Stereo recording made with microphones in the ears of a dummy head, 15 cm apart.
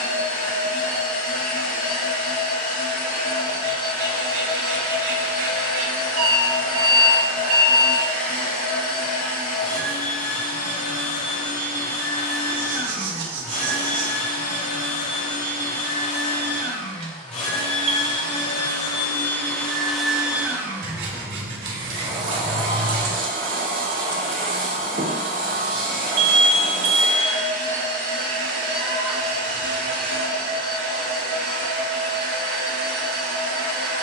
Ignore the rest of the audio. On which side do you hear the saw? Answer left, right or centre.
right.